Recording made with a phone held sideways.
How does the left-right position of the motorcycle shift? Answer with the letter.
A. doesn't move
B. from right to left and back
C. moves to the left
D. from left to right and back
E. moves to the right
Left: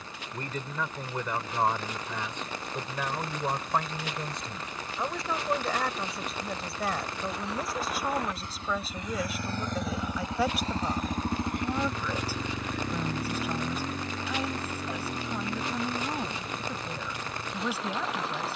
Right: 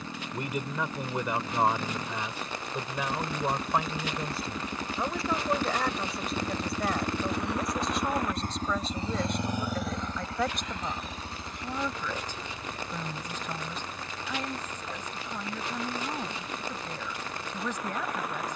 C.